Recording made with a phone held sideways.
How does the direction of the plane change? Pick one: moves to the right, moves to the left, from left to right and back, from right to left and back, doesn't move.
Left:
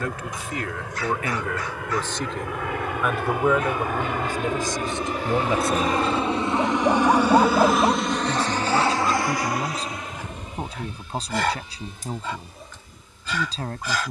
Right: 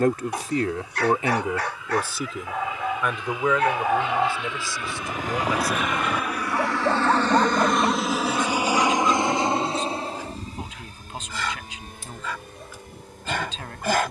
moves to the right.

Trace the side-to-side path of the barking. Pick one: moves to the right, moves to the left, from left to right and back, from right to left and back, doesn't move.
from right to left and back.